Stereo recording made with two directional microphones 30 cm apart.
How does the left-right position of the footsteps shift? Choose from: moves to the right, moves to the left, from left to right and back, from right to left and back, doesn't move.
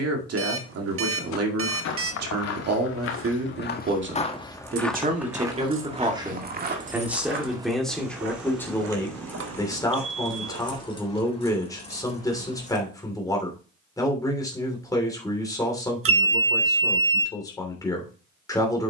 moves to the right.